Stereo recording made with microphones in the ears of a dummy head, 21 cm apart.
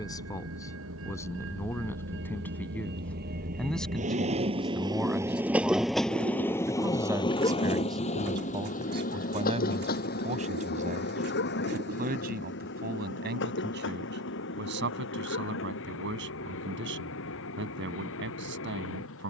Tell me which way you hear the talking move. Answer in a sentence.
You can hear the talking move to the right.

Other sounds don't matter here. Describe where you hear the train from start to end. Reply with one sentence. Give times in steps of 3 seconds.
You can hear the train on the right from 0 s and on the left from 6 s.